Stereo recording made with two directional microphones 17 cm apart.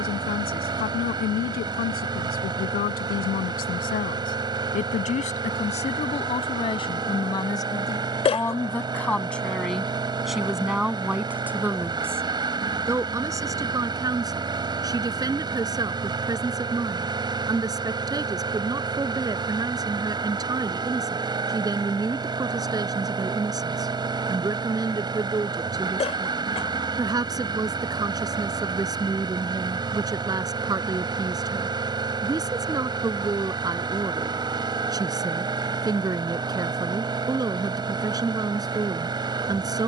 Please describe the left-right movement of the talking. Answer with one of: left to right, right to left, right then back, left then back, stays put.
left to right.